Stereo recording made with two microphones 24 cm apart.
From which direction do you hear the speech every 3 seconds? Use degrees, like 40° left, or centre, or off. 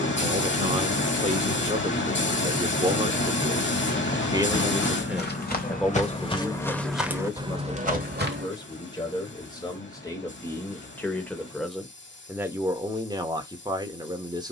30° right, 10° right, 10° left, 10° left, 20° right.